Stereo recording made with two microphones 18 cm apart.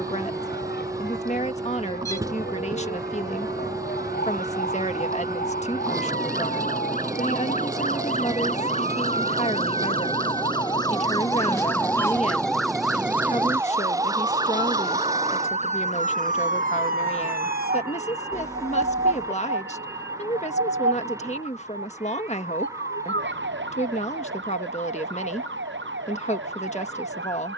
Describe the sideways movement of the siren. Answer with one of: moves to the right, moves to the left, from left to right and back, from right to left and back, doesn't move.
moves to the right.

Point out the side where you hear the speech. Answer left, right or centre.
left.